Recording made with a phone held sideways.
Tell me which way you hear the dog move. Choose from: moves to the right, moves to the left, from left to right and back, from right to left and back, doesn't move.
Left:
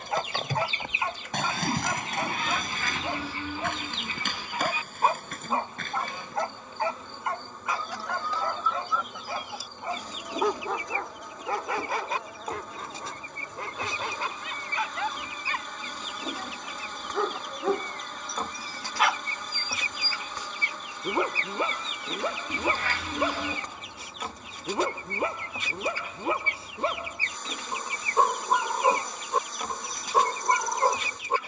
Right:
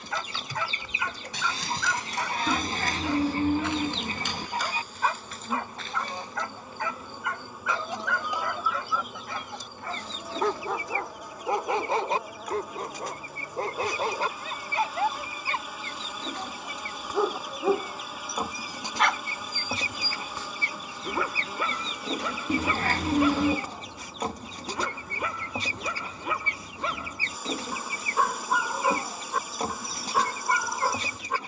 from left to right and back.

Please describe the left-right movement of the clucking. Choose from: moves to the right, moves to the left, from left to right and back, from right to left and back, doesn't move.
from right to left and back.